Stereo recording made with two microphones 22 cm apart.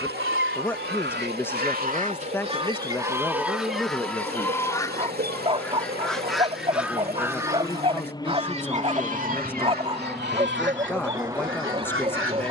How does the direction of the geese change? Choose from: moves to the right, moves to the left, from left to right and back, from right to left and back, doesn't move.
from right to left and back.